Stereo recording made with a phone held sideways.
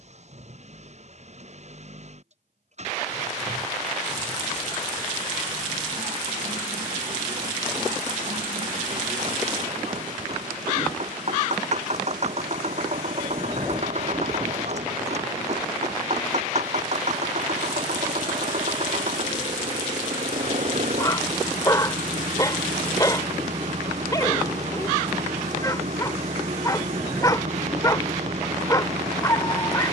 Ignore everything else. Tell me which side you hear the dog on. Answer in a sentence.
In this clip you hear the dog on the left.